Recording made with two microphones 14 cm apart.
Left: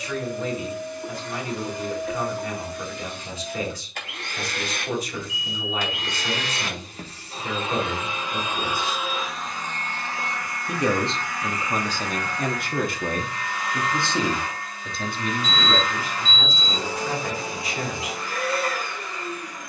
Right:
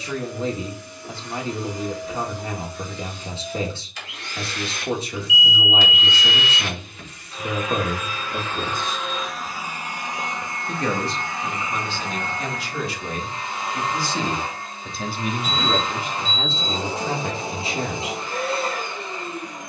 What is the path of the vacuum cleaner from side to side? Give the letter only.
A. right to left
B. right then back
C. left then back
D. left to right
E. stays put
D.